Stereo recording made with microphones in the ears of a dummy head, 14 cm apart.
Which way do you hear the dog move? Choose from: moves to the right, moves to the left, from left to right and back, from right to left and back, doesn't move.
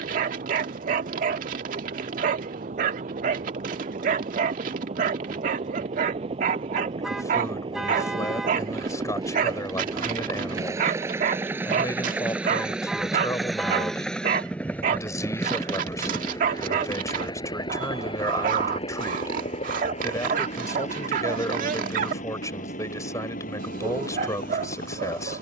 doesn't move.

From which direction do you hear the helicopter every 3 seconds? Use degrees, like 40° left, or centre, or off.
60° right, 50° right, 40° right, 20° right, centre, 20° left, 40° left, 50° left, 60° left.